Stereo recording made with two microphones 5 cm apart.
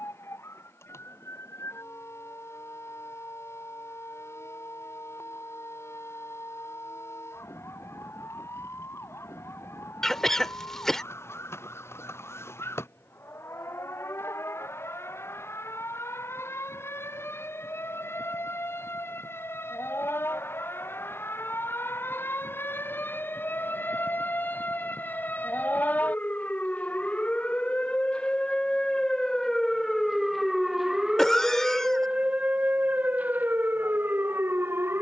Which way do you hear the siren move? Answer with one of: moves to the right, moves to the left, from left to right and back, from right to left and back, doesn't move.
moves to the right.